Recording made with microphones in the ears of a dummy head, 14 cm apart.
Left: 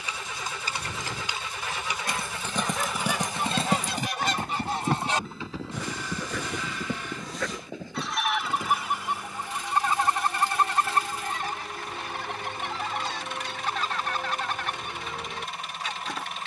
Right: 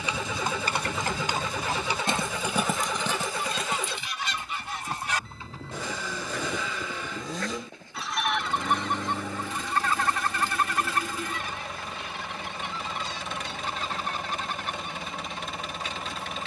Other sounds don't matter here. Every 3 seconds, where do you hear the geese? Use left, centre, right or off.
left, left, centre, left, left, left.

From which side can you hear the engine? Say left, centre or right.
right.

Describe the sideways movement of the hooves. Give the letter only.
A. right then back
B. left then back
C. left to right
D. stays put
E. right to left
E.